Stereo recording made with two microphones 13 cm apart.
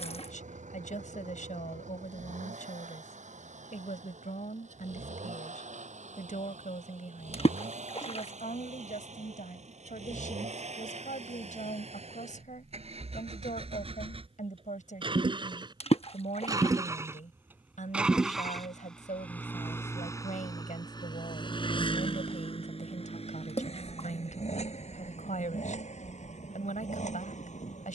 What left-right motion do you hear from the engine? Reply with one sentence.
You can hear the engine move from right to left.